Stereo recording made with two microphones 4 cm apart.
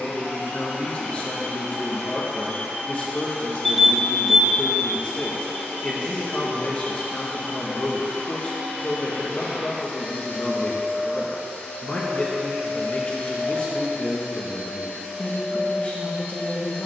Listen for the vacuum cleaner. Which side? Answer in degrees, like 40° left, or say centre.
70° left.